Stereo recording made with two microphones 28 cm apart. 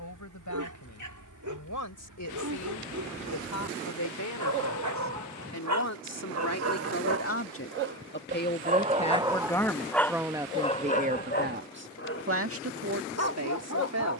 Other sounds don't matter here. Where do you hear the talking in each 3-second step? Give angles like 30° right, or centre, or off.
70° left, 70° left, 40° left, 10° right, 50° right.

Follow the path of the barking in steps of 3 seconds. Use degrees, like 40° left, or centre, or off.
80° right, 70° right, 40° right, 10° left, 50° left.